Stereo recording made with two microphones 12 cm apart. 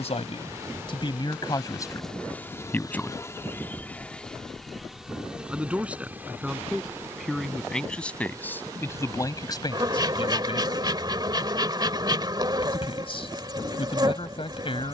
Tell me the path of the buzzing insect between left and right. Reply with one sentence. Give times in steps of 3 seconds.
In this clip you hear the buzzing insect in the centre from 0 s and on the right from 6 s.